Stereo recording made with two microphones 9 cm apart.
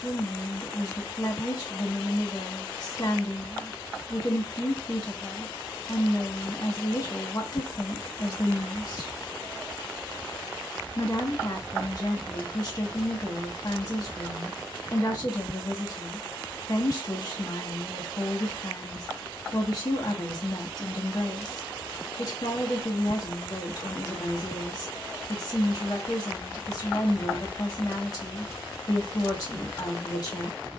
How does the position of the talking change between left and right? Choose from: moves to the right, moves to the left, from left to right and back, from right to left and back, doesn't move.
doesn't move.